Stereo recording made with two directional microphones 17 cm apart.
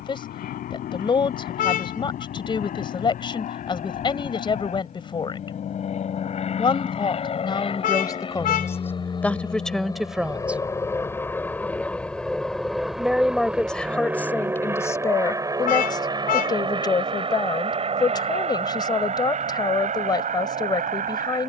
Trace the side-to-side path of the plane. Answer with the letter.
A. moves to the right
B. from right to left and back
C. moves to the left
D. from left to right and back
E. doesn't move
A.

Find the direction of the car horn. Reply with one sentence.
You can hear the car horn on the left.